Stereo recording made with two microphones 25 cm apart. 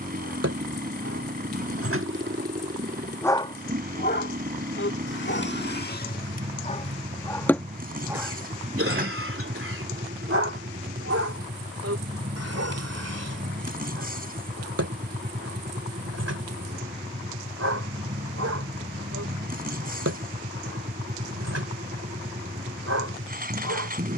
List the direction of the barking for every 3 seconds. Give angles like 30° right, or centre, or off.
60° right, 40° left, centre, 60° right, 80° right, 80° right, 80° right, 80° right.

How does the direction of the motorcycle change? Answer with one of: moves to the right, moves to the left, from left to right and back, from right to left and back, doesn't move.
doesn't move.